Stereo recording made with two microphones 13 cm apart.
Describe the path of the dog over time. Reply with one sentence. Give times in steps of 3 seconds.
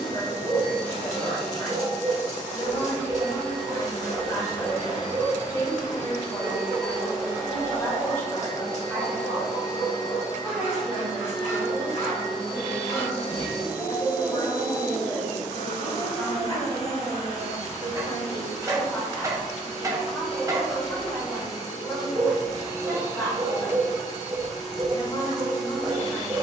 You can hear the dog on the right from 0 s, in the centre from 6 s, on the left from 9 s, in the centre from 15 s and on the right from 18 s.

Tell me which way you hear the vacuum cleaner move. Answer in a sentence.
You can hear the vacuum cleaner stay put.